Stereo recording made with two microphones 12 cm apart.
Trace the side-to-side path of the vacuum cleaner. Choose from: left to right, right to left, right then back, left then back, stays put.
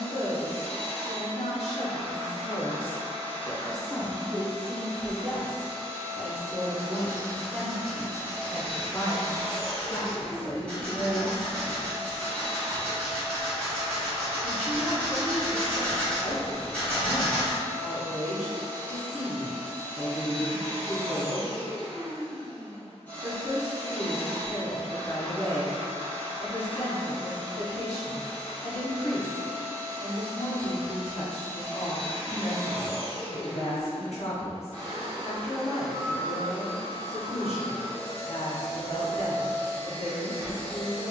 stays put.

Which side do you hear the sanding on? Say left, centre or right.
centre.